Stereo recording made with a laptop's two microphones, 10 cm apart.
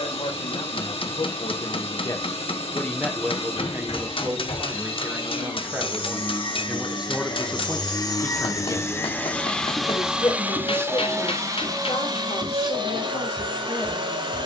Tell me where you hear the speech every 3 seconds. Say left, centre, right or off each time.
left, right, centre, left, left.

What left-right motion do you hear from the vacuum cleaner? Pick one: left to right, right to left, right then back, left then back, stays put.
left to right.